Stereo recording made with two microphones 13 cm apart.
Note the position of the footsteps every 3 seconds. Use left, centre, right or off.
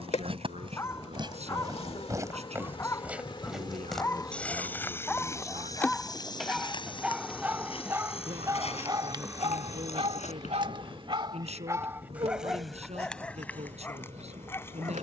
right, centre, left, left, off.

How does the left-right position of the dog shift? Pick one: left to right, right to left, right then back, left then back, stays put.
right then back.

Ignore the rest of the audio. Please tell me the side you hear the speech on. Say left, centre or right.
right.